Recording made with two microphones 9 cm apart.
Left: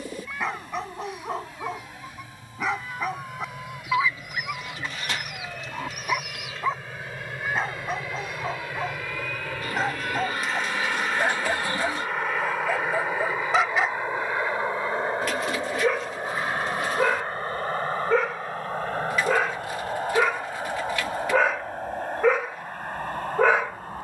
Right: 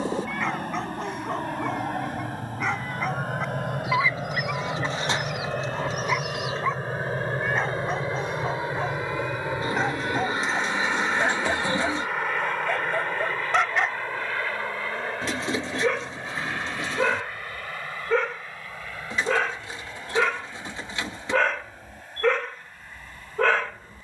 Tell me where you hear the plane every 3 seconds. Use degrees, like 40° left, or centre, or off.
60° right, 50° right, 40° right, 10° right, 10° left, 30° left, 40° left, 50° left.